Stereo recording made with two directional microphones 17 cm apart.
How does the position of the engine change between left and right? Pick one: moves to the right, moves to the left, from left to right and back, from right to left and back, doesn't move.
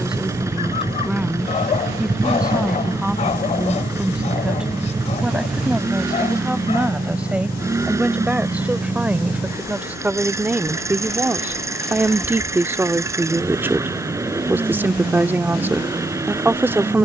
doesn't move.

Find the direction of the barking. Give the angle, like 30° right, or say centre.
40° left.